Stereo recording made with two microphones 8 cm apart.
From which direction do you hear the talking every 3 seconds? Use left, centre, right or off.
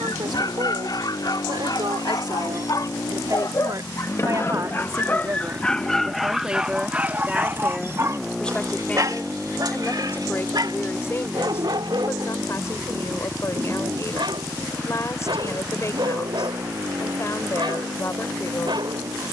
right, right, centre, left, left, left, left.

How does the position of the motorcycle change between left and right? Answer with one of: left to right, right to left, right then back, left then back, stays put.
left to right.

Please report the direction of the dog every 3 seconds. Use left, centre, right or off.
left, left, right, right, right, right, right.